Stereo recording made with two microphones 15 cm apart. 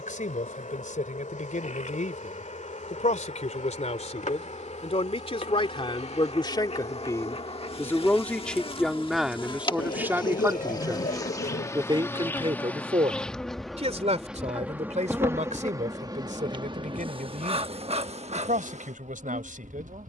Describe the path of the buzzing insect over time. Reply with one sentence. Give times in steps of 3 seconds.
In this clip you hear the buzzing insect on the left from 0 s, in the centre from 12 s and on the right from 15 s.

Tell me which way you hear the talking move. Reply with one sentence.
You can hear the talking move from left to right.